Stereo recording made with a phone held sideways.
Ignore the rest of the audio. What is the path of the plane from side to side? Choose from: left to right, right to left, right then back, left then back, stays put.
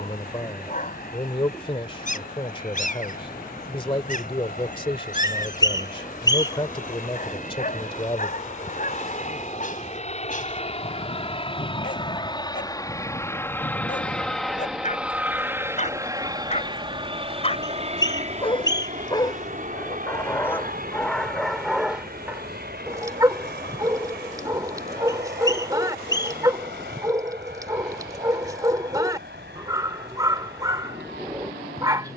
left to right.